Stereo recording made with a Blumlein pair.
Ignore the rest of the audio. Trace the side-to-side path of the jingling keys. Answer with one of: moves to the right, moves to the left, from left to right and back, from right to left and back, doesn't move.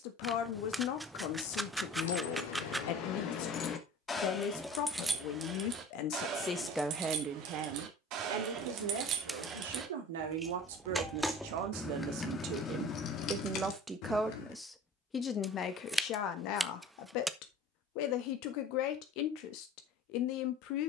from left to right and back.